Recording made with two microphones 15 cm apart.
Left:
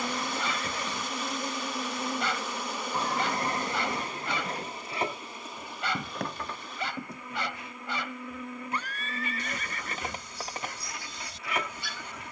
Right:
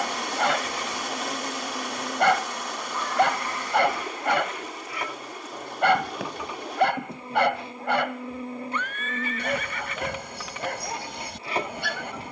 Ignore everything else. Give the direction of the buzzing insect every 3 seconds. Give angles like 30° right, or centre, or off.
centre, 20° left, 20° right, 30° right.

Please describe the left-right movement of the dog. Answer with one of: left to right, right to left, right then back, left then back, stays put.
stays put.